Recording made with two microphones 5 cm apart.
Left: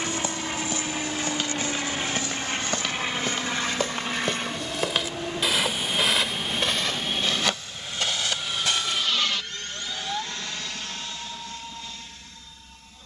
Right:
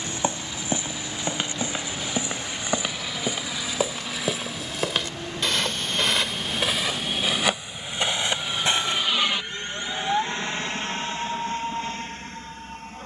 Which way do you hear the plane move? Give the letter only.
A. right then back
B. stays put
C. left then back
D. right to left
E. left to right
E.